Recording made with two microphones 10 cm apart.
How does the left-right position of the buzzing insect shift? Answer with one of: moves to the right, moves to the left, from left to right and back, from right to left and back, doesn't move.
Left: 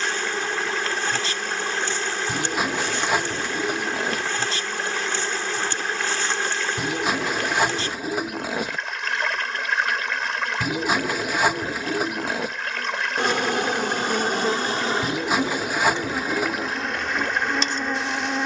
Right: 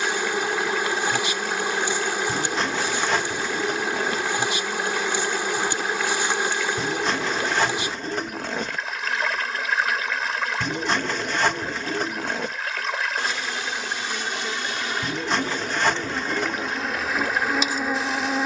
from right to left and back.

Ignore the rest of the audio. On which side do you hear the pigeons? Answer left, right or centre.
centre.